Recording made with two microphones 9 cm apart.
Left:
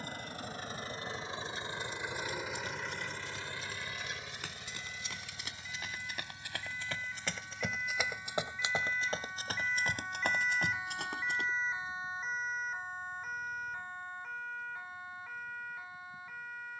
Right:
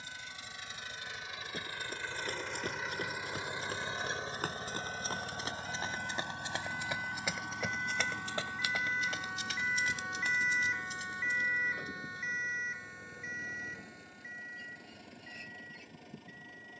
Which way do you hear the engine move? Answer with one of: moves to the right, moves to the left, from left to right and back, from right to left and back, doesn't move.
moves to the right.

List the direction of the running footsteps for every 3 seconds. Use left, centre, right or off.
right, right, centre, left, off, off.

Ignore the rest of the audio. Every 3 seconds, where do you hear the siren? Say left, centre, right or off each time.
right, right, right, centre, left, left.